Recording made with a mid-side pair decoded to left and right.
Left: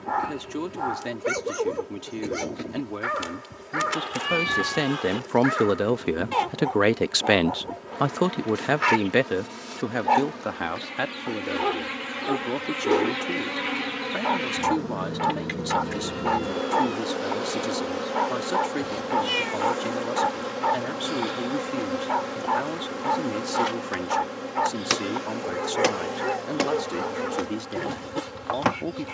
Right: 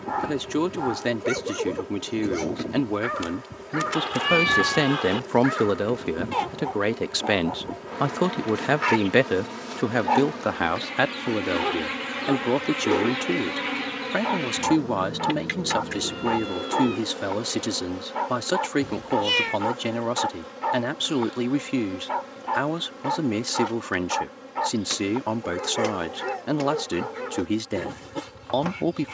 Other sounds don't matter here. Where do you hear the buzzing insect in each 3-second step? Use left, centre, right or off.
right, right, right, right, centre, left, left, left, left, left.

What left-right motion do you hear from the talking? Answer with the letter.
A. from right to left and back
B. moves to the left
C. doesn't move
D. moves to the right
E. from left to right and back
A.